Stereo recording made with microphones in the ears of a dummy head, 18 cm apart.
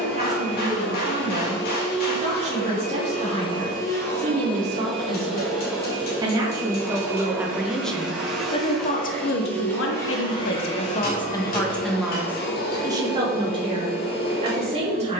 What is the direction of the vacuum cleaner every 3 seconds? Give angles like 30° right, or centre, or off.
50° left, 10° left, 10° right, 30° left, 50° left.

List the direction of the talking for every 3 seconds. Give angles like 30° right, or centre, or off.
30° right, 30° right, centre, 40° left, 20° right.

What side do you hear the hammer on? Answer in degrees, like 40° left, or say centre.
40° left.